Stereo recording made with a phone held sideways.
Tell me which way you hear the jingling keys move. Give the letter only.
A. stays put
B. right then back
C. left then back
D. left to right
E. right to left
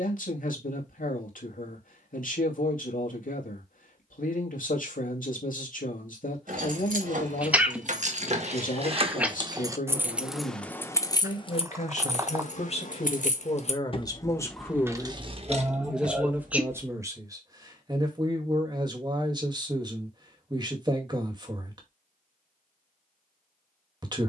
C.